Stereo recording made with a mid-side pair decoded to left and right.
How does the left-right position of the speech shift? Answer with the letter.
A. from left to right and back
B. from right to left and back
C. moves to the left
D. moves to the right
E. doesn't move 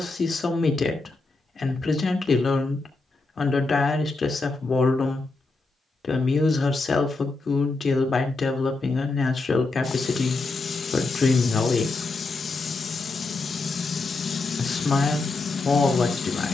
E.